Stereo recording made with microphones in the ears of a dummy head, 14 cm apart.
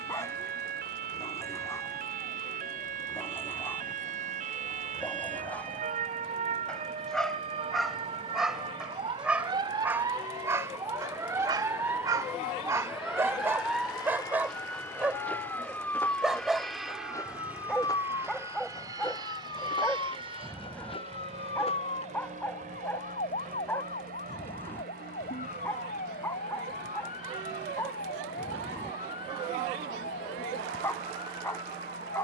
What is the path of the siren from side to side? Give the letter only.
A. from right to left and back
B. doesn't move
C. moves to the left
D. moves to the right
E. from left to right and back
C.